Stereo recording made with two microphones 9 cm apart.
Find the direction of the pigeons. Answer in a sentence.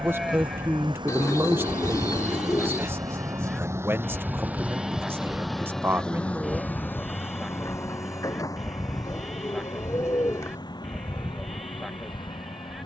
You can hear the pigeons on the left.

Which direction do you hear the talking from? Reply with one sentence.
In this clip you hear the talking on the right.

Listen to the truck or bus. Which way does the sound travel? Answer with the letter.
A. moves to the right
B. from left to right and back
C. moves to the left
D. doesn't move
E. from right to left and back
C.